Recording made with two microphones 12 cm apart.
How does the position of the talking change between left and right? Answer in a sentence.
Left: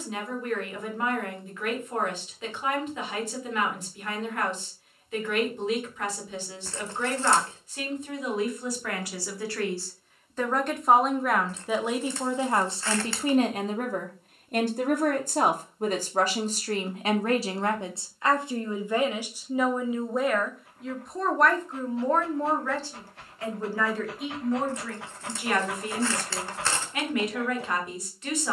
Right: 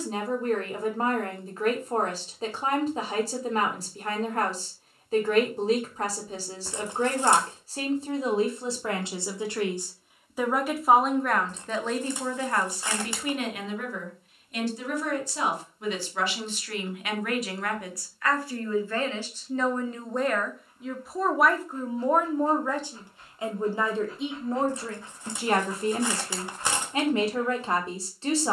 You can hear the talking go left and come back.